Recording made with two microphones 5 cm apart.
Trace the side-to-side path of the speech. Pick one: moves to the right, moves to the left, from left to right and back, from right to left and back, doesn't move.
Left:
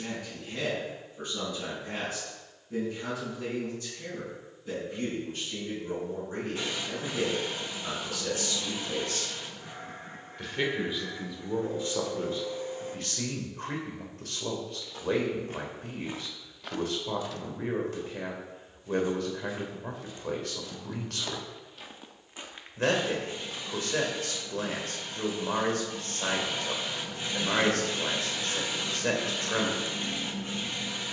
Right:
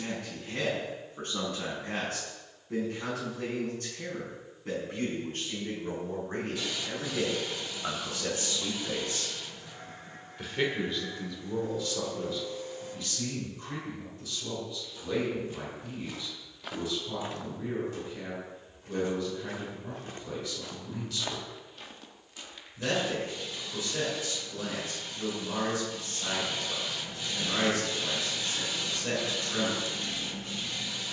moves to the left.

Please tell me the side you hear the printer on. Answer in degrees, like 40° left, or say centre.
30° left.